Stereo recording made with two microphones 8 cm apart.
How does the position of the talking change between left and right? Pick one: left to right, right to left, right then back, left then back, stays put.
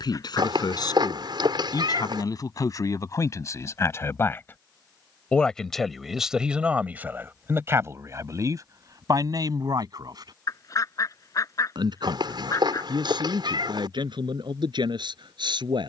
left to right.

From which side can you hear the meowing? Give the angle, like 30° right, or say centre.
70° right.